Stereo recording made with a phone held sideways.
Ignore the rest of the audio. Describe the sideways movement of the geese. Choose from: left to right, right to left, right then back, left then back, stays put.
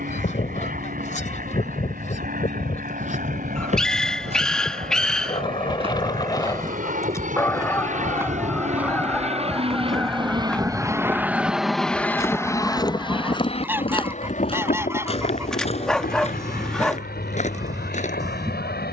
left to right.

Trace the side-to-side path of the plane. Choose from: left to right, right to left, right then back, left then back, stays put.
right to left.